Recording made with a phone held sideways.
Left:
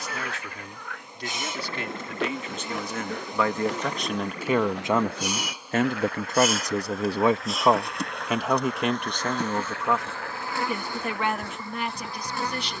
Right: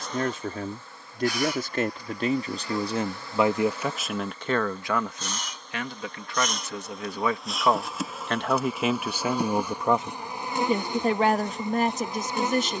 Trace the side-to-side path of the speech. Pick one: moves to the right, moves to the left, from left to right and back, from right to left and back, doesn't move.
from right to left and back.